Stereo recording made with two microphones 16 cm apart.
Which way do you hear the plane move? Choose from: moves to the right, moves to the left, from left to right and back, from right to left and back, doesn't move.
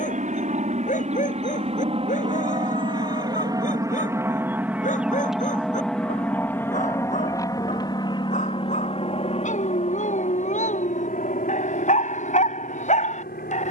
moves to the left.